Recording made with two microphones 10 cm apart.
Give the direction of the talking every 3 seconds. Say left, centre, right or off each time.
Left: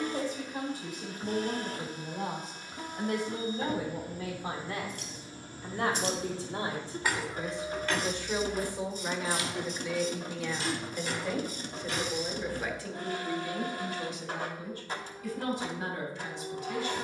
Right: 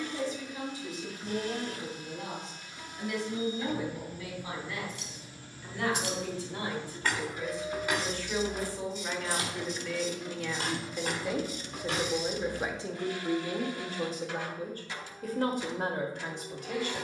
left, left, left, centre, right, right.